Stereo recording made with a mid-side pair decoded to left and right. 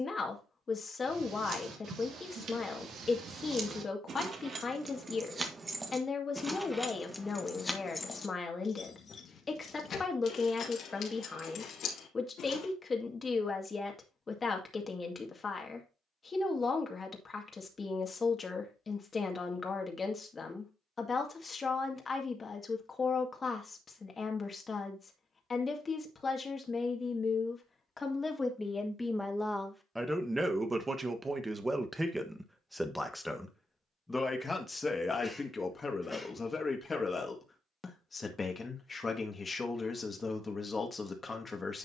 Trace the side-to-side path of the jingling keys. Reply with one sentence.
In this clip you hear the jingling keys travel towards the left.